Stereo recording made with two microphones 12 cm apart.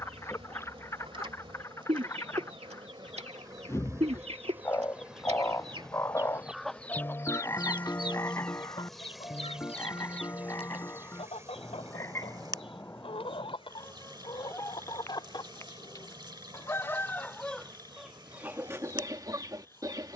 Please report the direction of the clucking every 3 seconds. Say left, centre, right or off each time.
right, right, left, left, left, left, right.